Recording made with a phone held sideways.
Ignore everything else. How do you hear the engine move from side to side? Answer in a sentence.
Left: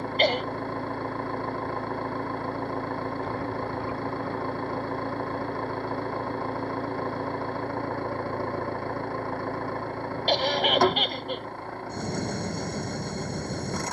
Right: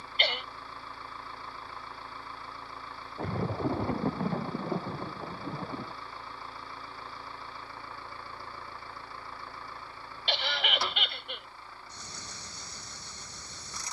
You can hear the engine stay in one place.